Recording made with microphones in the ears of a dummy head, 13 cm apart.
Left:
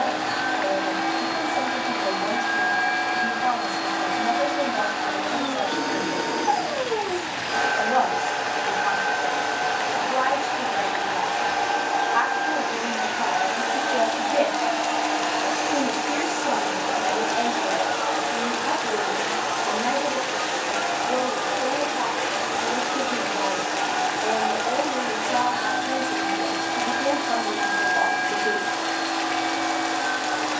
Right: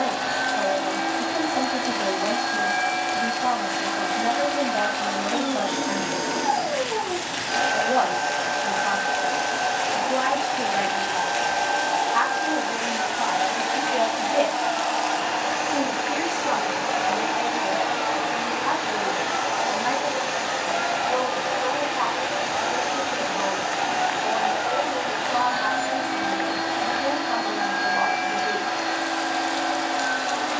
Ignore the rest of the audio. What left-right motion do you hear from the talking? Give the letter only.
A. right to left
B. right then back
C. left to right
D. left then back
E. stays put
A.